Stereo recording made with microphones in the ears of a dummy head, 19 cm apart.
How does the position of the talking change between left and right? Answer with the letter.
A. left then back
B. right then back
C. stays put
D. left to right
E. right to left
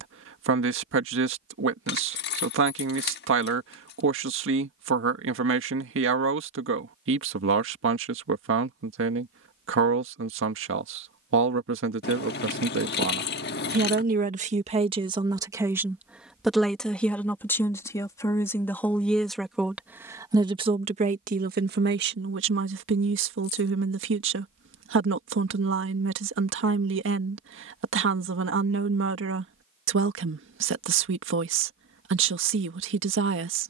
A.